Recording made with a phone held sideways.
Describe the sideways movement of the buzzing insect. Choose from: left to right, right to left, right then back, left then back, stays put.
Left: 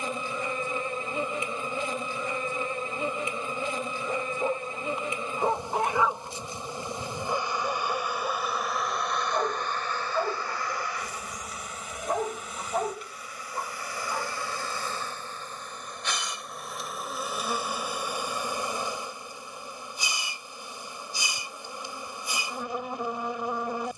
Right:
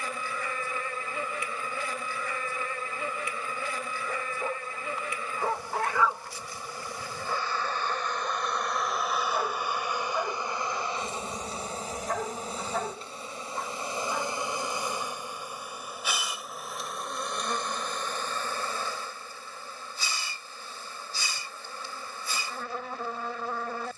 right then back.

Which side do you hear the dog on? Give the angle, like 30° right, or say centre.
20° left.